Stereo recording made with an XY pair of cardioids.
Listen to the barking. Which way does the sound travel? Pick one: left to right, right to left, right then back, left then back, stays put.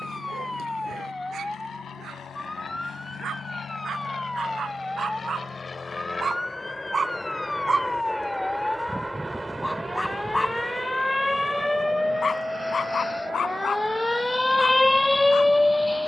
right to left.